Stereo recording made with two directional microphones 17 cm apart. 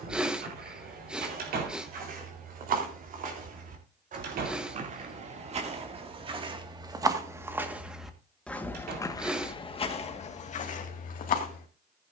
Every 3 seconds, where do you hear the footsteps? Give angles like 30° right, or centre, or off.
60° right, 50° right, 10° right, 40° left.